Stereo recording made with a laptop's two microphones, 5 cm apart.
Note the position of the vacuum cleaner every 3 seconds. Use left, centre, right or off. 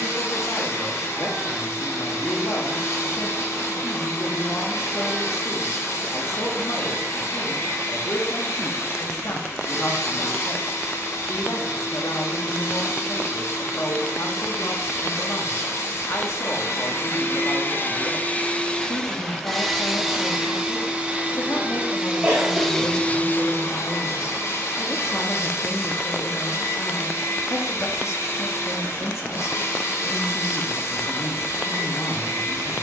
left, left, left, left, left, left, centre, centre, left, left, left.